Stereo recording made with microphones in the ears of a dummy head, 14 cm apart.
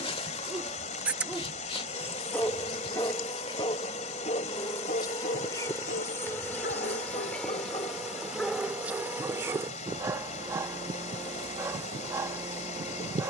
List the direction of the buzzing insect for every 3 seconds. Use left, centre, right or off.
left, left, centre, right, right.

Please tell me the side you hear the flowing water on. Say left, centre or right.
left.